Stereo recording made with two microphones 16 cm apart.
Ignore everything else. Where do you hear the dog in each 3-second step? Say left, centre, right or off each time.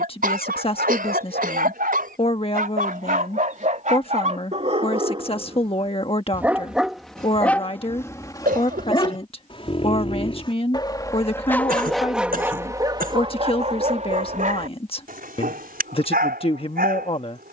right, right, centre, left, right, right.